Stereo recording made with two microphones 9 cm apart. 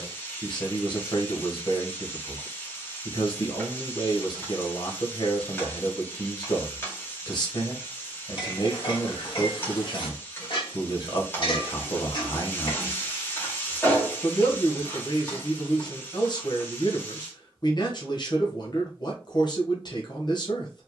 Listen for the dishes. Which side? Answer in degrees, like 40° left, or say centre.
60° left.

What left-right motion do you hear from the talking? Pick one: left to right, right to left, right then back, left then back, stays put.
stays put.